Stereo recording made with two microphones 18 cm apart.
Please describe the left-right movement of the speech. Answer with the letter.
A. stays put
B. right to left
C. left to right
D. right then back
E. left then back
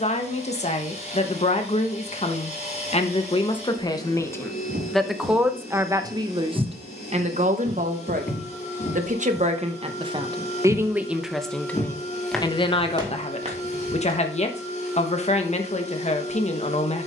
D.